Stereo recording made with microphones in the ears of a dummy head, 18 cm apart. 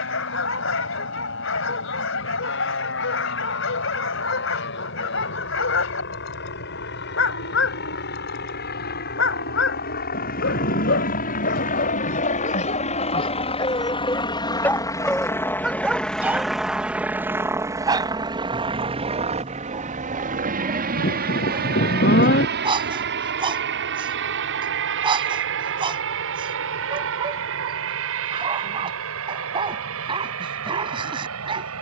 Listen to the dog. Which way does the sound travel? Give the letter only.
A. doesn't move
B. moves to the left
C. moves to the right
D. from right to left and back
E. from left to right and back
C.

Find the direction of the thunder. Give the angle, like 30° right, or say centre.
40° left.